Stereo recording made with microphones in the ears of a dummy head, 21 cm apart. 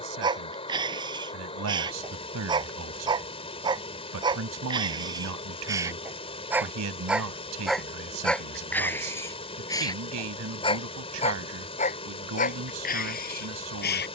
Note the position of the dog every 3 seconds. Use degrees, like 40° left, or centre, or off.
20° right, 20° right, centre, 20° left, 40° left.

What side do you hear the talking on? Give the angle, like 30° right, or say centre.
70° right.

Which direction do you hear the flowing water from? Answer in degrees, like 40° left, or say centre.
30° left.